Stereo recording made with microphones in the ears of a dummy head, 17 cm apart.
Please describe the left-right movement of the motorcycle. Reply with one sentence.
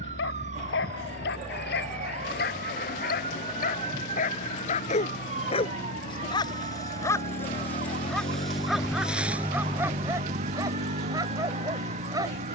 In this clip you hear the motorcycle travel towards the right.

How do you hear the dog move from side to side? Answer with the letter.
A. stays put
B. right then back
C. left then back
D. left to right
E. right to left
D.